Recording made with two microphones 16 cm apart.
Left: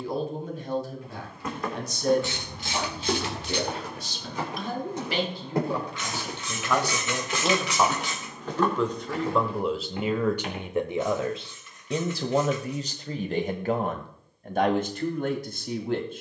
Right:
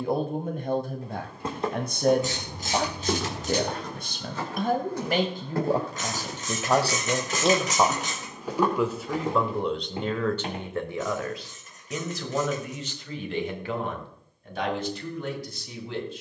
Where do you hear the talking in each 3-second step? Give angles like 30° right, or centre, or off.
50° right, 50° right, 30° right, 10° left, 40° left, 50° left.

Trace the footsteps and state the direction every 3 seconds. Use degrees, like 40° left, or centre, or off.
20° right, 10° left, centre, 30° right, off, off.